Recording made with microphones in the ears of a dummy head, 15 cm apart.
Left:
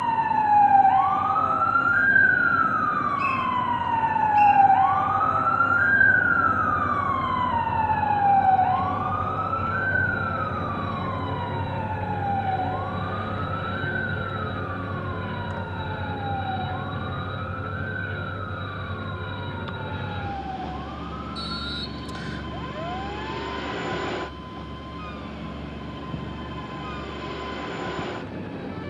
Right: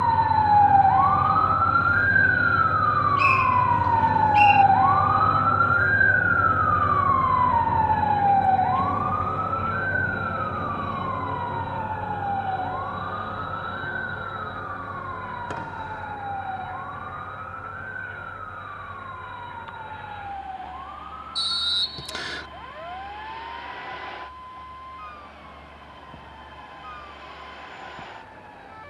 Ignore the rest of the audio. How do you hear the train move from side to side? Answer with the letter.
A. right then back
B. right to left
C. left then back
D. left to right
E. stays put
B.